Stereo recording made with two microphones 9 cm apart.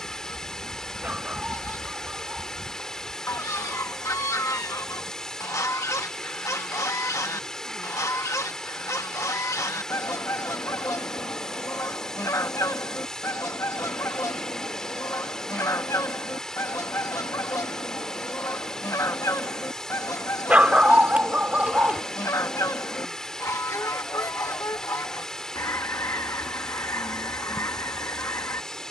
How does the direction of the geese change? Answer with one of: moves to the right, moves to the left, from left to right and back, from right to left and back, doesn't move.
doesn't move.